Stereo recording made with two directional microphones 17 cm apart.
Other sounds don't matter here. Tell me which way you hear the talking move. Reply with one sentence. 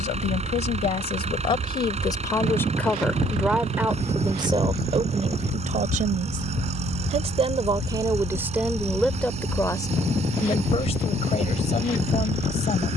You can hear the talking go right and come back.